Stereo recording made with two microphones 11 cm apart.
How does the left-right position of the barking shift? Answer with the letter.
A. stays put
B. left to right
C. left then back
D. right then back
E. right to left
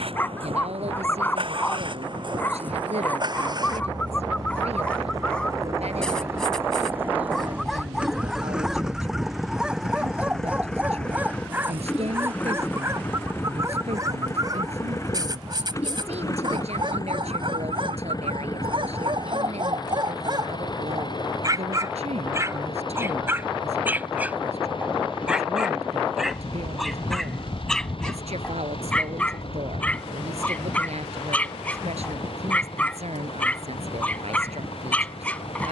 D.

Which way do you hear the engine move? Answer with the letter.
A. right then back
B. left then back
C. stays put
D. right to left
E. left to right
D.